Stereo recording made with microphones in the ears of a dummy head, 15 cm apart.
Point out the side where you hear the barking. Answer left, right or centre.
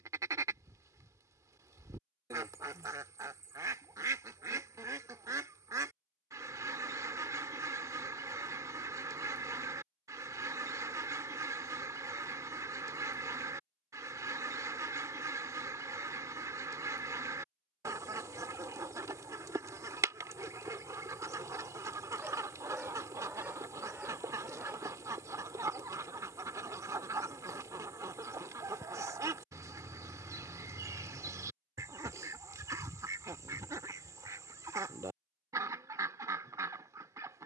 centre.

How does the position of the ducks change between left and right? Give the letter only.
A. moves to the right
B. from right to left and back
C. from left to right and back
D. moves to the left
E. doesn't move
E.